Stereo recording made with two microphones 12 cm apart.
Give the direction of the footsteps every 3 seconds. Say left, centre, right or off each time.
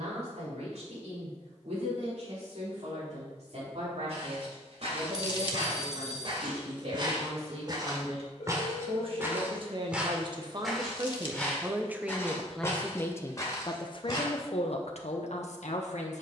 off, right, right, centre, left, off.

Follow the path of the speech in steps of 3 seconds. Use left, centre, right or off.
right, right, right, right, left, left.